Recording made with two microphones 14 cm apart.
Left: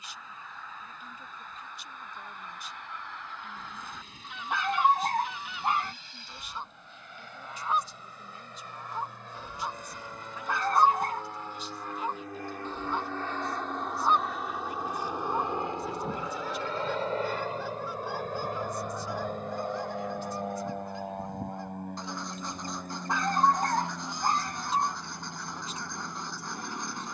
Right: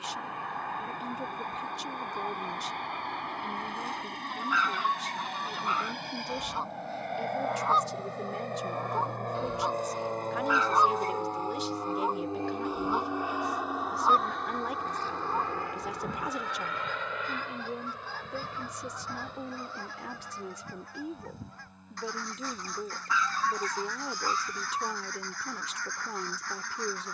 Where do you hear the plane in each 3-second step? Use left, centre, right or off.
right, right, right, right, centre, left, left, left, left.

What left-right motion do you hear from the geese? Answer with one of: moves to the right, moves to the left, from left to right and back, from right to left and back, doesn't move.
moves to the left.